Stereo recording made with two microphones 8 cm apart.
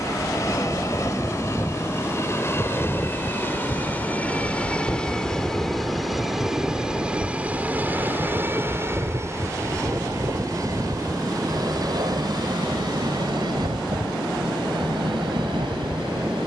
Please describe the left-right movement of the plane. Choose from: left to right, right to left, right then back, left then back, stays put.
left to right.